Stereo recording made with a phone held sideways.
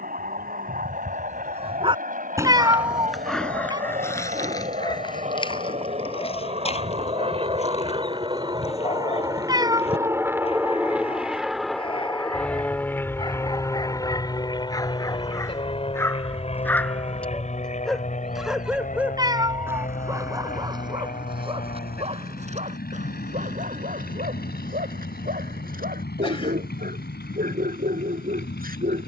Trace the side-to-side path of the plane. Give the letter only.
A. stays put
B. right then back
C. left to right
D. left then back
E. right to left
E.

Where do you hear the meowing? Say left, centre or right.
right.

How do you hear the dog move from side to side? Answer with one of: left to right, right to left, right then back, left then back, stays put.
left then back.